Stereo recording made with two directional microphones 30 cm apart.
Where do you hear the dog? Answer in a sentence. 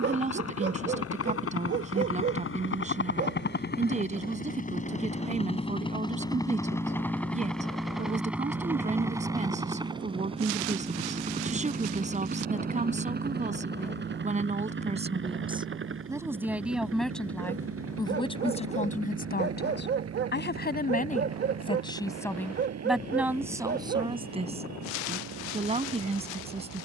You can hear the dog on the right.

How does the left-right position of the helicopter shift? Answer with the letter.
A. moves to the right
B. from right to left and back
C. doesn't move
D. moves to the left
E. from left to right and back
A.